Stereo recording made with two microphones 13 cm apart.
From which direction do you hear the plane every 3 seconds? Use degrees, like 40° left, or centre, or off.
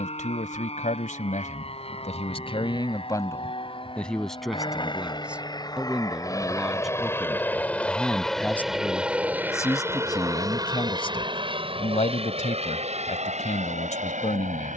50° left, 40° left, 10° left, 30° right, 50° right.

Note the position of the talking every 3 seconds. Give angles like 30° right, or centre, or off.
60° left, centre, centre, 30° left, 60° left.